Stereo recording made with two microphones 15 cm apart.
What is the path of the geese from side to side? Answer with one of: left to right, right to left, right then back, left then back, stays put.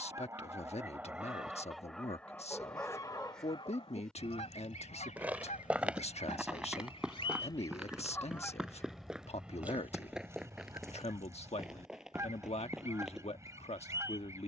left then back.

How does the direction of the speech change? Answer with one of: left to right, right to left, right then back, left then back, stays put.
stays put.